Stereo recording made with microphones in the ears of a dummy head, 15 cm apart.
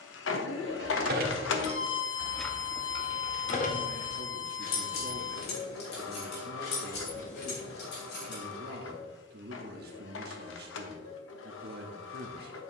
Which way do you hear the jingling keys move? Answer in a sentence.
In this clip you hear the jingling keys move to the left.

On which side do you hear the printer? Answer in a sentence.
In this clip you hear the printer on the left.